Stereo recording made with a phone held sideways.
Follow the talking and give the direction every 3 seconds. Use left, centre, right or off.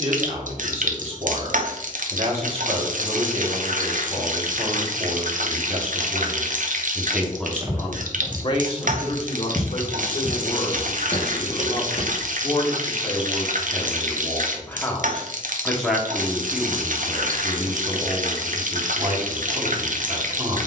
right, right, centre, left, left, centre, right.